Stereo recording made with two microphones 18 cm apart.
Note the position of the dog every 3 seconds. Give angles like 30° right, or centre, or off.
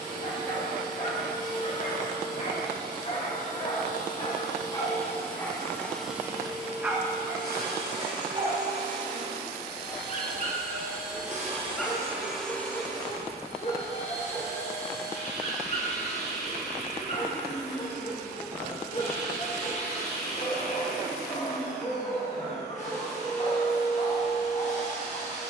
50° left, 20° left, 20° right, 30° right, 30° left, 40° left, 40° left, 40° left, 40° left.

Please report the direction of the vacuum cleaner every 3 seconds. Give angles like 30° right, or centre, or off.
50° left, 40° left, 50° right, 60° right, 30° left, 40° left, 40° left, 40° left, 40° left.